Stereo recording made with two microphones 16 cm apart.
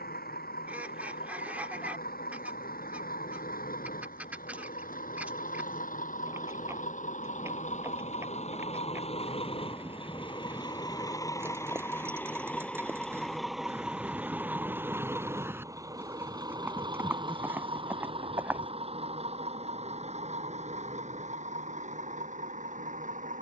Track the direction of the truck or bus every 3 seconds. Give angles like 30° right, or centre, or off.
70° left, 60° left, 50° left, 30° left, centre, 30° right, 40° right, 50° right.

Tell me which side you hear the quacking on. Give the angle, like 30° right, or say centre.
10° right.